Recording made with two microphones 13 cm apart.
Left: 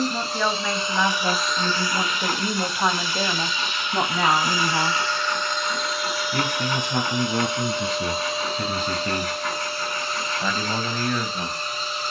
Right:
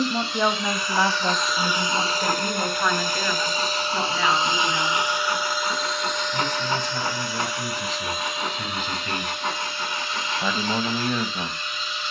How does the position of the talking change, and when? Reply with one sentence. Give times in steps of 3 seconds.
In this clip you hear the talking in the centre from 0 s, on the left from 3 s and in the centre from 9 s.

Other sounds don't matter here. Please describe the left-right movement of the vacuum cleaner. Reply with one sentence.
You can hear the vacuum cleaner go right and come back.